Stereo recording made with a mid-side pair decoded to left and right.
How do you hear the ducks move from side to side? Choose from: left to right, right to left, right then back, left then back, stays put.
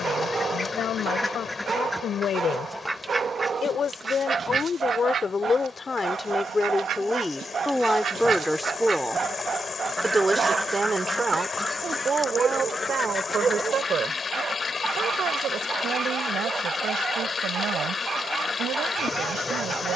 right then back.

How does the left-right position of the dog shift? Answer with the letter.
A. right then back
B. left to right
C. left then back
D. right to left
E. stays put
E.